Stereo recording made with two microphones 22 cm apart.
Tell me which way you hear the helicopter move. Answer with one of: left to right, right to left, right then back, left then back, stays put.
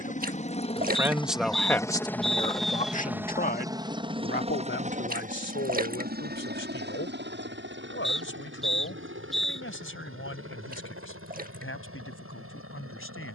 left to right.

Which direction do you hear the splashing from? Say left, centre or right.
right.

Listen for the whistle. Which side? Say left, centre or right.
centre.